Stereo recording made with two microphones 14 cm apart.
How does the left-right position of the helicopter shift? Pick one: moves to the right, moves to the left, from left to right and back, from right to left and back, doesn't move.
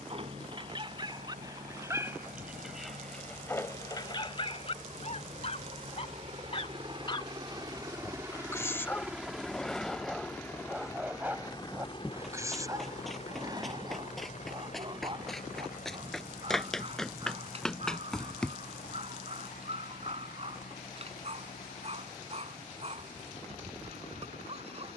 moves to the left.